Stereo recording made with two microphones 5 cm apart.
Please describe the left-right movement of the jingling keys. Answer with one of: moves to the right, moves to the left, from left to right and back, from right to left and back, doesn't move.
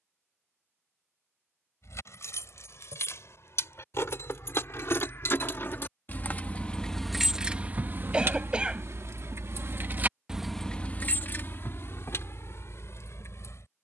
from left to right and back.